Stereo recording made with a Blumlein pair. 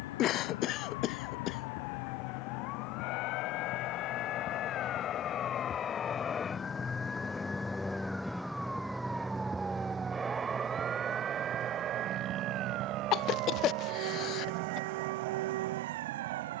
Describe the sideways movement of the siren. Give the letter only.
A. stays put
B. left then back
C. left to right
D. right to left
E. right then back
C.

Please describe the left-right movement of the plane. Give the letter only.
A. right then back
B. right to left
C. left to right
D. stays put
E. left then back
C.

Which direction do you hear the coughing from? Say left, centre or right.
left.